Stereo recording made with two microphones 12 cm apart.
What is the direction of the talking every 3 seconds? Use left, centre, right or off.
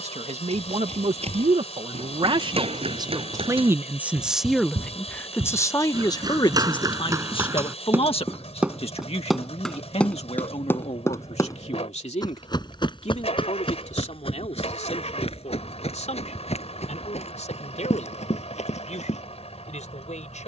right, centre, left, left, left, left, left.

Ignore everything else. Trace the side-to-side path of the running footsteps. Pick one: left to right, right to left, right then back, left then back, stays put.
right to left.